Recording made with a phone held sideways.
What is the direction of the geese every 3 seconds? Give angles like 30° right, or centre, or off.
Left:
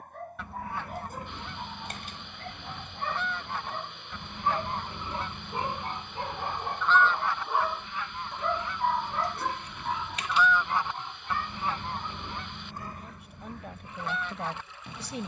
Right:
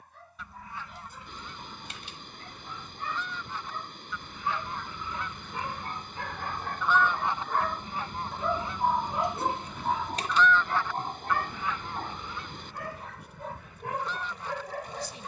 60° left, 40° left, 20° right, 10° left, 60° left.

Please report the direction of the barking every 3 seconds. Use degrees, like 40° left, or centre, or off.
50° left, 40° left, 10° left, 40° right, 70° right.